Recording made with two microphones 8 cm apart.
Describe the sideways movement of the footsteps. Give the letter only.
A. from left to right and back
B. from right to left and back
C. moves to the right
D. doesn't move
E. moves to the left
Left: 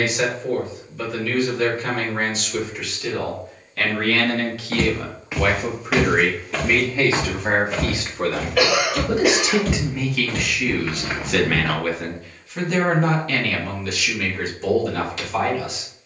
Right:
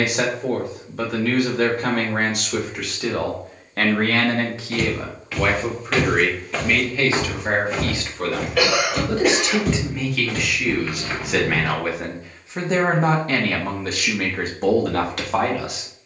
A.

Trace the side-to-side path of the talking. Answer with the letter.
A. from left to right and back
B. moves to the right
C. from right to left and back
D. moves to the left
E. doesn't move
C.